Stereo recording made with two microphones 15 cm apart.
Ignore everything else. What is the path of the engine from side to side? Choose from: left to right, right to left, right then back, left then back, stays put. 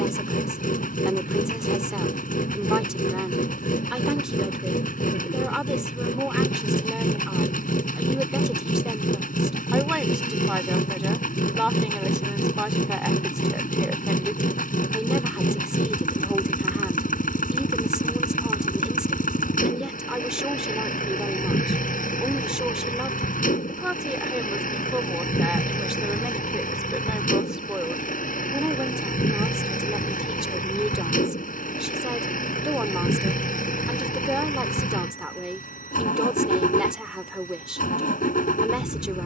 stays put.